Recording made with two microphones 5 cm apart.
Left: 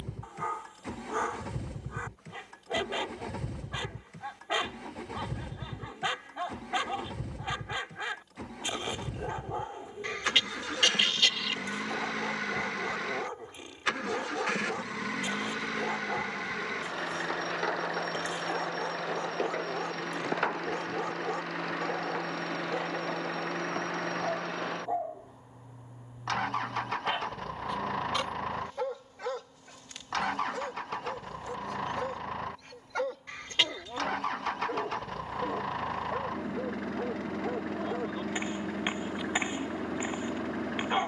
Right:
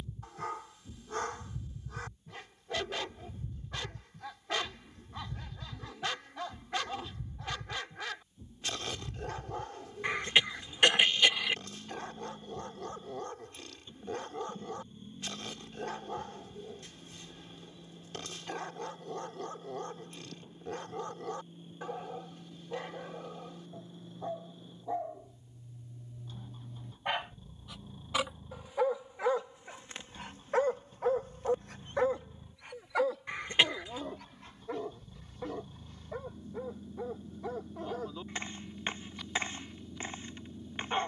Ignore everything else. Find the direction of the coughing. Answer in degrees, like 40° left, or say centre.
20° right.